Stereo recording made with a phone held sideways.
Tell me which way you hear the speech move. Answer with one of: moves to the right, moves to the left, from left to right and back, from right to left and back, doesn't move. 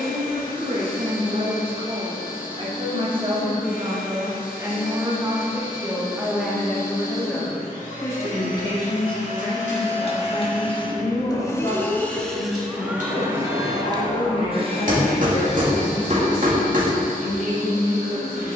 moves to the left.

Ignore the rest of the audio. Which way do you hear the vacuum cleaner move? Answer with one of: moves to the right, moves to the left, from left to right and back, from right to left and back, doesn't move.
moves to the right.